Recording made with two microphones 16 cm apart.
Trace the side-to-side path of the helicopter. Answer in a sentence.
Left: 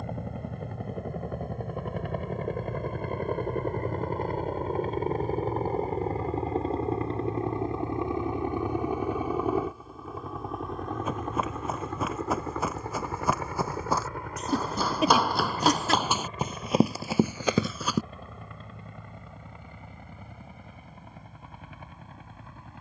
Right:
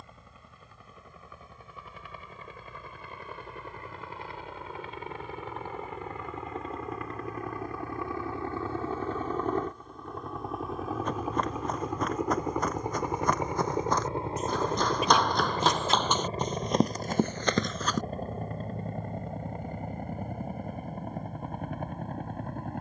You can hear the helicopter travel towards the right.